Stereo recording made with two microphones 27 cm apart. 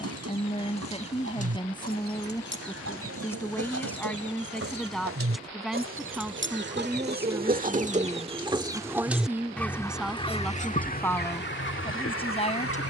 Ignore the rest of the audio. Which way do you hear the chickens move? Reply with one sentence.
In this clip you hear the chickens move to the left.